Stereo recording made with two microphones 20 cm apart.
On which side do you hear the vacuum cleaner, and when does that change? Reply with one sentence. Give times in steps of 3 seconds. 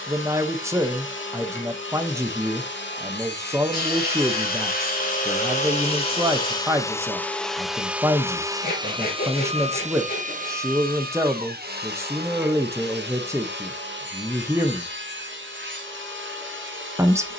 In this clip you hear the vacuum cleaner on the left from 0 s, in the centre from 6 s and on the right from 9 s.